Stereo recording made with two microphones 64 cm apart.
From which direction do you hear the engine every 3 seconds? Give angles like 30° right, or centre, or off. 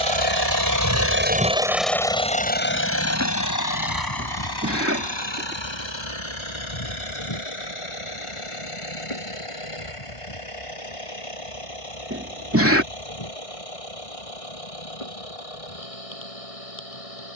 10° right, 30° left, 50° left, 50° left, 60° left, 60° left.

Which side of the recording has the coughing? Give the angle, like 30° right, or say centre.
20° right.